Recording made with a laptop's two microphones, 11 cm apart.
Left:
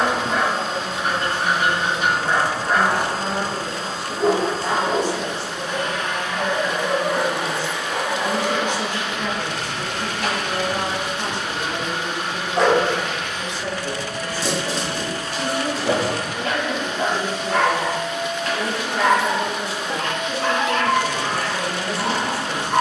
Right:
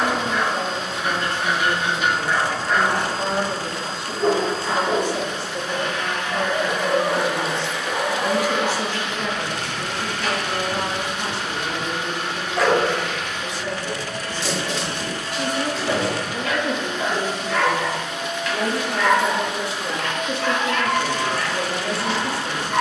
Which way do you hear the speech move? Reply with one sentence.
In this clip you hear the speech go left and come back.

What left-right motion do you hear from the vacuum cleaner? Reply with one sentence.
You can hear the vacuum cleaner stay put.